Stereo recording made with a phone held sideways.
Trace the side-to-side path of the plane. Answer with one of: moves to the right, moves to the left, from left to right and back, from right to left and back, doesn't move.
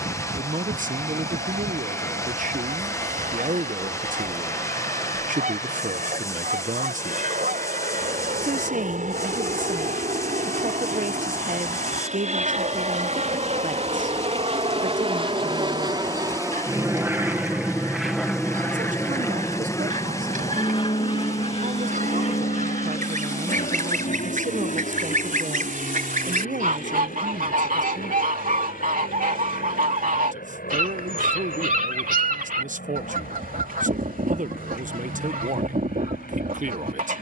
moves to the left.